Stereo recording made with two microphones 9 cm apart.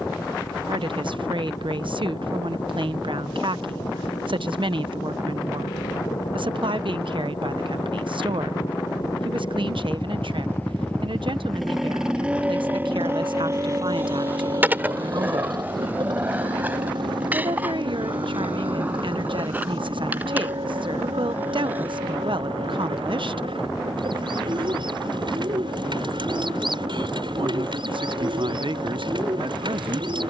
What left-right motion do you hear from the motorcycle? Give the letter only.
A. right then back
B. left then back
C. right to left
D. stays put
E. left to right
E.